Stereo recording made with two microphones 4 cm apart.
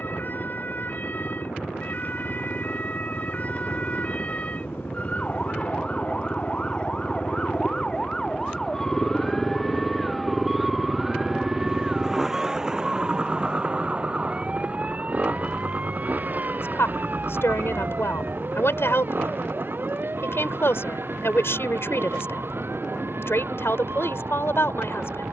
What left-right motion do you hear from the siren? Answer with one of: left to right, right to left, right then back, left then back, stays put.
left to right.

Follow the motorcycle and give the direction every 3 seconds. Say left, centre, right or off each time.
left, left, left, centre, right, right, right, right, right.